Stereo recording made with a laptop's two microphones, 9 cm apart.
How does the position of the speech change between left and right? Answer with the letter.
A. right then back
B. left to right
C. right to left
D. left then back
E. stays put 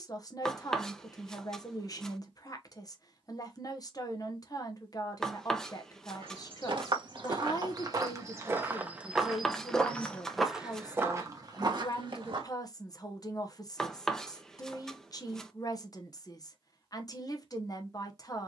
E.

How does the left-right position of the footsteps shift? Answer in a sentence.
You can hear the footsteps move from right to left and back again.